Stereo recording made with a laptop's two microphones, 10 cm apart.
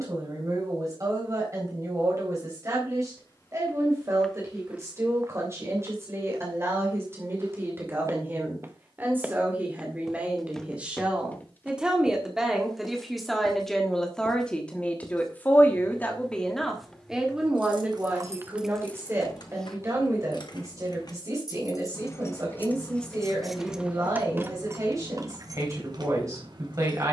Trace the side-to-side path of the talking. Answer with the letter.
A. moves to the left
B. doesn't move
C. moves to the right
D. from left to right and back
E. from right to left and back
E.